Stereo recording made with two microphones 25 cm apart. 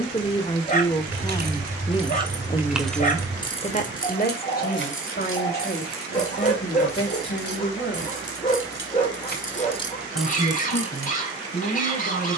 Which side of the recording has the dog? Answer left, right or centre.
left.